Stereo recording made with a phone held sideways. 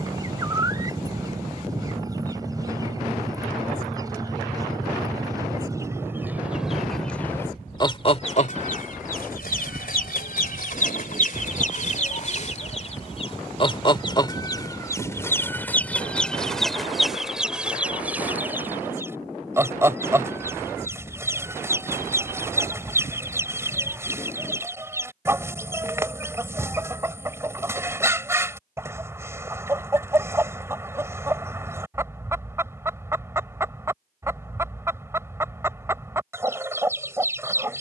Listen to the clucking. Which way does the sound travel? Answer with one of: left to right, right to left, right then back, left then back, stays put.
left then back.